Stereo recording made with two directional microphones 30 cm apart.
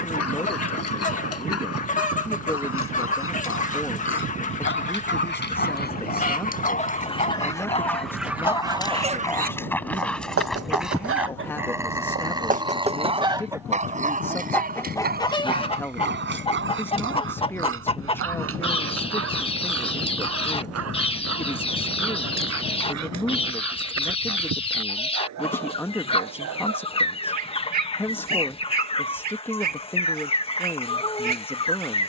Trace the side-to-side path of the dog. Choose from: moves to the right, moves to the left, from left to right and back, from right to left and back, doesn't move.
moves to the right.